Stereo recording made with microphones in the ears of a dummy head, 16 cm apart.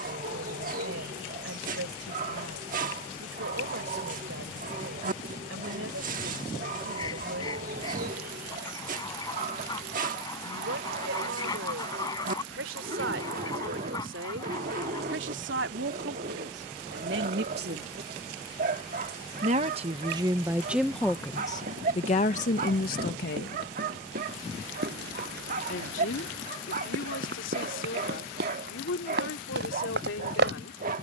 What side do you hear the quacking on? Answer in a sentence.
You can hear the quacking on the left.